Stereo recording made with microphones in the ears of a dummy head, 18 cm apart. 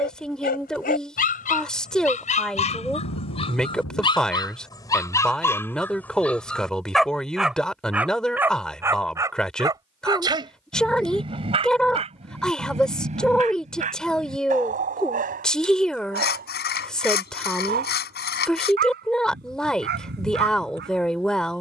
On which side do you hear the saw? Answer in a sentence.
You can hear the saw on the left.